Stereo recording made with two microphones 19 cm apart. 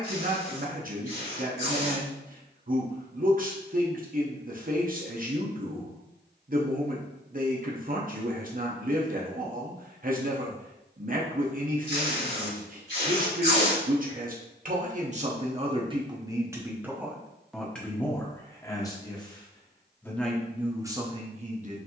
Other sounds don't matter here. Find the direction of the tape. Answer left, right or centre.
left.